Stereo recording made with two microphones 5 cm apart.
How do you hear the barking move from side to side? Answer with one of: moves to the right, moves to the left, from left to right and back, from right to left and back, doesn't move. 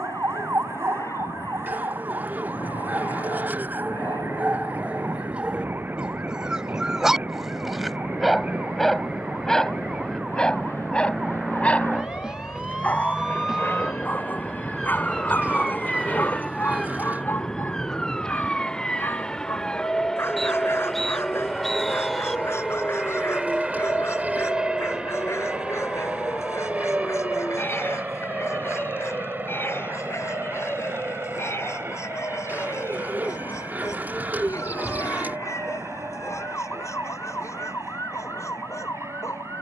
moves to the left.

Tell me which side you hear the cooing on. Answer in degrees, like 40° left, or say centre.
30° right.